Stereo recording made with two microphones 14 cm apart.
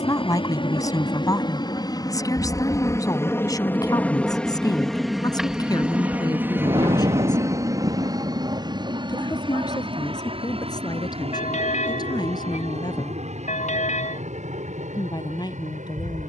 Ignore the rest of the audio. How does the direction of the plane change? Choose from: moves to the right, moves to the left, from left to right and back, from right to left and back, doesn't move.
moves to the right.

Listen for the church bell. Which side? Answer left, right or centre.
left.